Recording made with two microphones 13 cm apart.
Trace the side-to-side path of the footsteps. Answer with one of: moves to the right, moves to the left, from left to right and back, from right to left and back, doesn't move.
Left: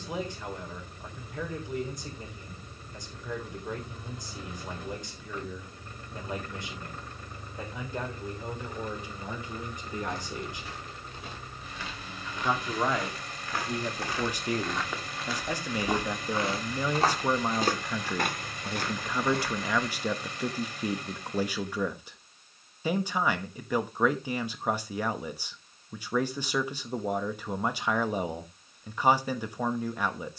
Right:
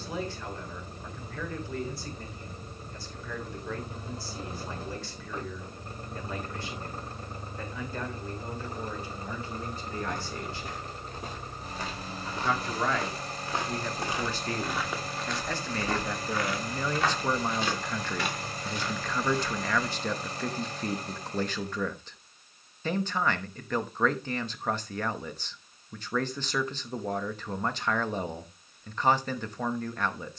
moves to the left.